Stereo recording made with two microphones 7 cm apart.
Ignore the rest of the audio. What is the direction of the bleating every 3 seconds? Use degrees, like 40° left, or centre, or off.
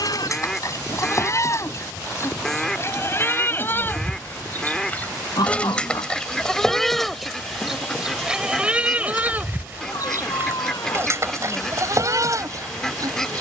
40° left, 30° left, centre, 30° right, 50° right.